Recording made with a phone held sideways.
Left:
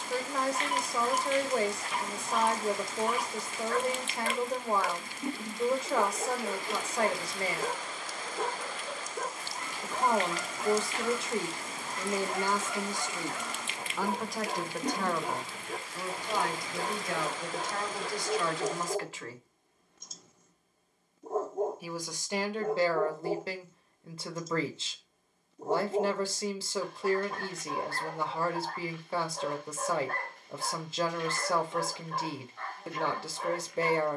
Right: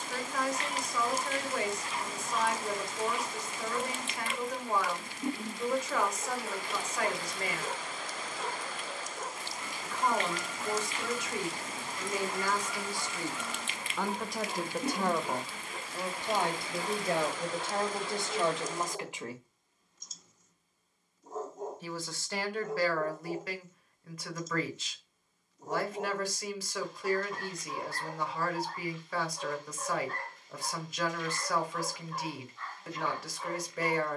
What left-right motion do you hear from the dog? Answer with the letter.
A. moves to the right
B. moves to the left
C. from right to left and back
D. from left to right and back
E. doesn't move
E.